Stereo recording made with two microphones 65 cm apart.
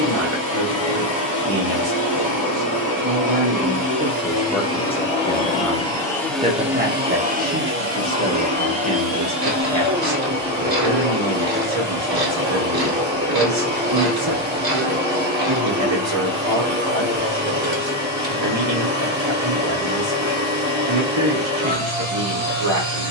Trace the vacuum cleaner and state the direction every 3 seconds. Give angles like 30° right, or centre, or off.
30° left, 20° left, 10° right, 40° right, 40° right, 40° right, 40° right, 40° right.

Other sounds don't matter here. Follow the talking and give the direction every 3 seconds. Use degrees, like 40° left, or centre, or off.
50° right, 10° right, 30° right, 50° right, 50° right, 50° right, 50° right, 50° right.